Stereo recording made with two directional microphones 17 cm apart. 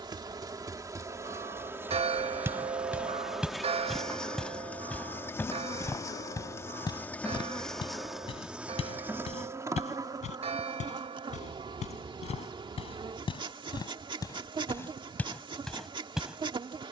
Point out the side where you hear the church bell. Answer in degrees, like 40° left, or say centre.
40° right.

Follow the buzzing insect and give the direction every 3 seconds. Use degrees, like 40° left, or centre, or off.
20° right, 10° left, 10° left, 20° right, 30° right, 30° right.